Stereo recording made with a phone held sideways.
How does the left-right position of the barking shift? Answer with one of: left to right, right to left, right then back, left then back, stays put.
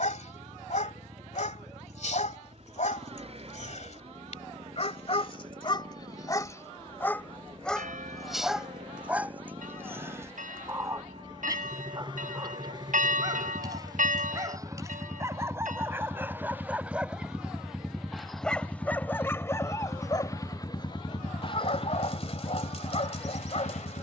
right then back.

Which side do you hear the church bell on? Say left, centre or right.
right.